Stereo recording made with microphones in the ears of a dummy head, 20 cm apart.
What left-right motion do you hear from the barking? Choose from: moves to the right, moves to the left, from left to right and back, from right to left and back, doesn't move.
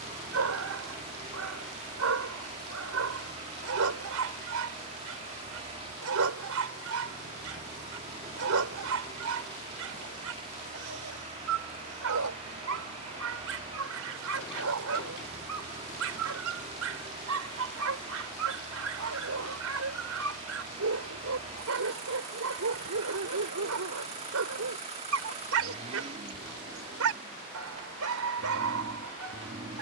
doesn't move.